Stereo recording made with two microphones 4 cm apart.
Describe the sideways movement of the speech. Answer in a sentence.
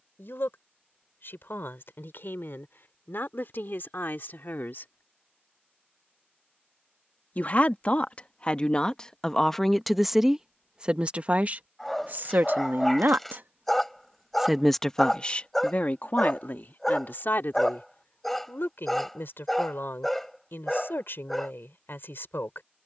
In this clip you hear the speech move from left to right and back again.